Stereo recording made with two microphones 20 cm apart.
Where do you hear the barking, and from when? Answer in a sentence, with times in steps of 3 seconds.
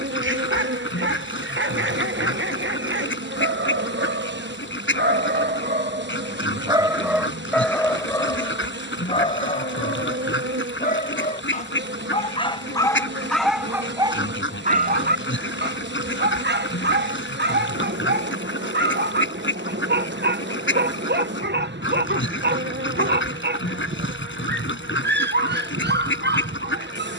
You can hear the barking on the right from 0 s, in the centre from 6 s, on the left from 9 s, in the centre from 12 s and on the right from 15 s.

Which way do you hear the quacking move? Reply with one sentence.
You can hear the quacking stay put.